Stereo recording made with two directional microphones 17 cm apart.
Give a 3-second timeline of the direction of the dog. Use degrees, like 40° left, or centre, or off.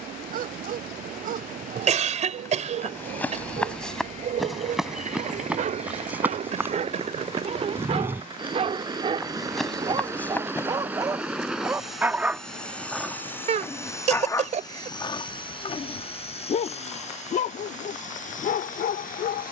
60° right, 50° right, 40° right, 20° right, 10° left, 40° left, 60° left.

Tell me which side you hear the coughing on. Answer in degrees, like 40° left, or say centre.
40° right.